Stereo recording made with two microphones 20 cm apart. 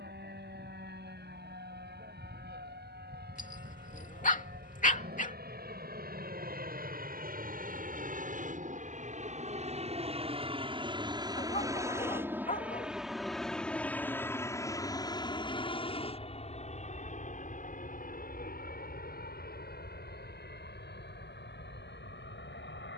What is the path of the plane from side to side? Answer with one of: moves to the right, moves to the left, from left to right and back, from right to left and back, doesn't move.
moves to the left.